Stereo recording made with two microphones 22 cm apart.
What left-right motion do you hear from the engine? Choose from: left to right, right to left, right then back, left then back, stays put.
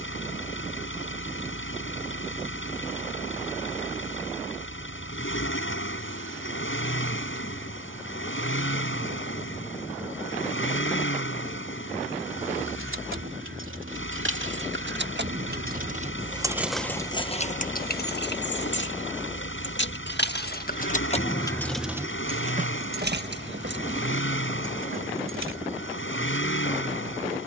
stays put.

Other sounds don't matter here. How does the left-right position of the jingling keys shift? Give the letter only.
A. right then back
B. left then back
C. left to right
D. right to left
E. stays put
B.